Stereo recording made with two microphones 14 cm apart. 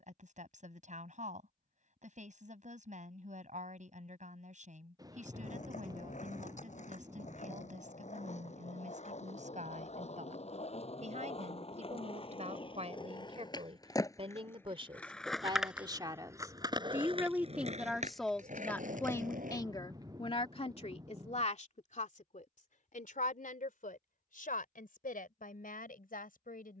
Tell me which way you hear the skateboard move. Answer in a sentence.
You can hear the skateboard move from left to right.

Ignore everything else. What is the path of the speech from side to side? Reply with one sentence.
You can hear the speech move from right to left.